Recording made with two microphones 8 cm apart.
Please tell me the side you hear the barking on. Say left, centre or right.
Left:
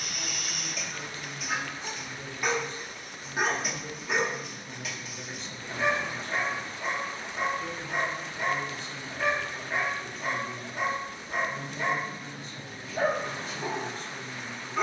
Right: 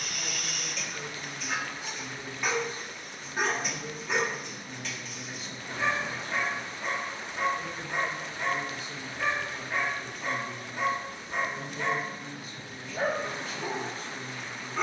centre.